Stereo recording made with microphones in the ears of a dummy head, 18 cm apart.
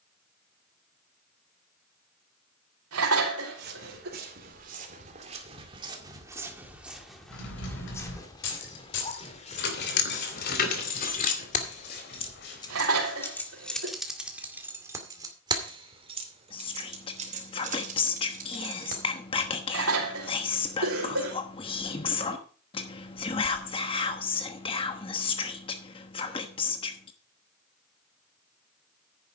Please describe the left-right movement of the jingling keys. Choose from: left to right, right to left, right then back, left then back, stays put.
left to right.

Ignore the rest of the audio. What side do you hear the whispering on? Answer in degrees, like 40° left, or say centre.
30° left.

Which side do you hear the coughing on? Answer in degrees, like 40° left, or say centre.
80° right.